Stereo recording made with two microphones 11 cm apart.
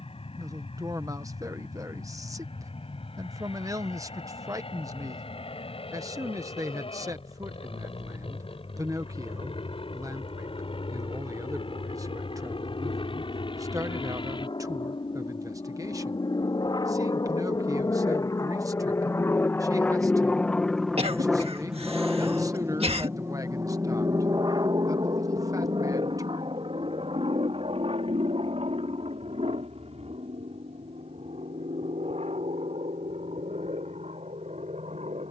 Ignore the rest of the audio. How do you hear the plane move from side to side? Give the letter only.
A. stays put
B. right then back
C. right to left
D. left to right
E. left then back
D.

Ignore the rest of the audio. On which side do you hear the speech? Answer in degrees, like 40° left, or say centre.
30° right.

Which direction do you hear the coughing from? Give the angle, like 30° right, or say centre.
70° right.